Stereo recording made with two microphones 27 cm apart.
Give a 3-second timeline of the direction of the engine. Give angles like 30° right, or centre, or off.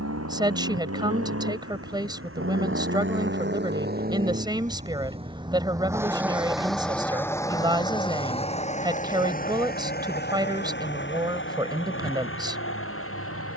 60° right, 30° right, 10° left, 40° left, 50° left.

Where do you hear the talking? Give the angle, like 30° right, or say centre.
20° right.